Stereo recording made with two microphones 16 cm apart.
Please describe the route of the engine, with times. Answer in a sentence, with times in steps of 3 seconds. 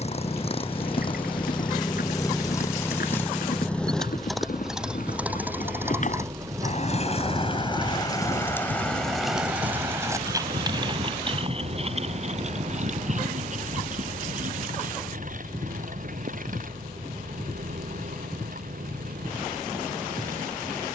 In this clip you hear the engine on the left from 0 s, in the centre from 3 s and on the right from 6 s.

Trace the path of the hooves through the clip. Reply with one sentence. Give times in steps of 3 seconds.
In this clip you hear the hooves on the left from 0 s, on the right from 9 s and not at all from 18 s.